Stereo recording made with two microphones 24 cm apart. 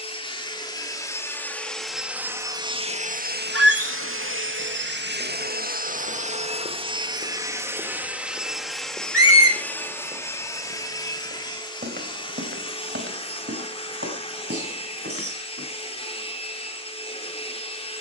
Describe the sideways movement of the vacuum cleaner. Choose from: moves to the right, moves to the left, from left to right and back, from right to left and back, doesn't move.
from left to right and back.